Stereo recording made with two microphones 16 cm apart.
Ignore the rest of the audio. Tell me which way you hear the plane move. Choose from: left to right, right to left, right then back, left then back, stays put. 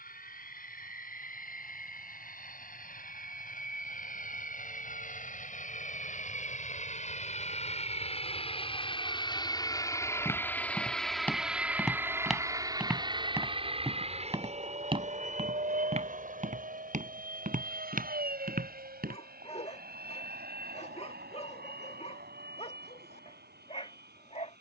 left to right.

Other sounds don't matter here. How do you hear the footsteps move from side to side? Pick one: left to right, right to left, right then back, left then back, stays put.
left to right.